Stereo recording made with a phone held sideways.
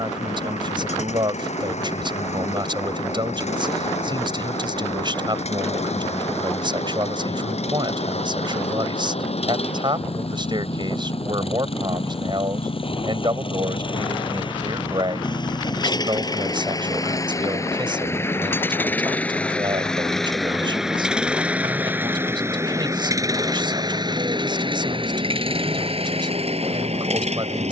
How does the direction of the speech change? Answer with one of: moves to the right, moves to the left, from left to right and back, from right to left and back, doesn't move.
doesn't move.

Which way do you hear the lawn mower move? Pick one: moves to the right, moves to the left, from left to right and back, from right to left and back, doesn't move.
moves to the right.